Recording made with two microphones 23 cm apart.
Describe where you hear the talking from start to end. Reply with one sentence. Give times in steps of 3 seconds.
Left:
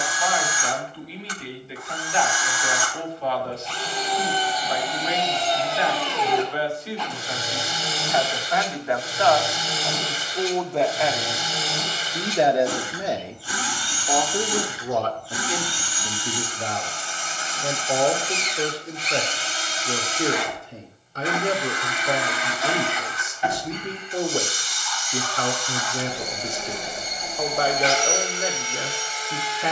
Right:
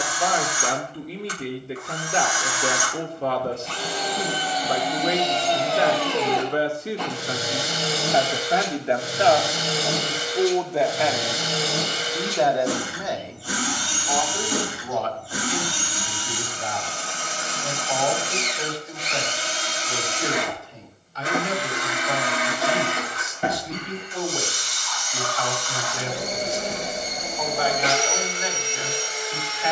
In this clip you hear the talking on the right from 0 s, in the centre from 9 s and on the left from 12 s.